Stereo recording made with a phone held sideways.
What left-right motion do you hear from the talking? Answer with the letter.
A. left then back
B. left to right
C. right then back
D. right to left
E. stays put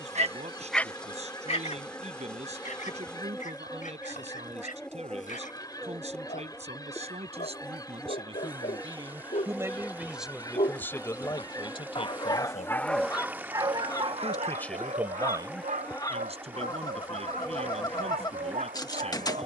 A.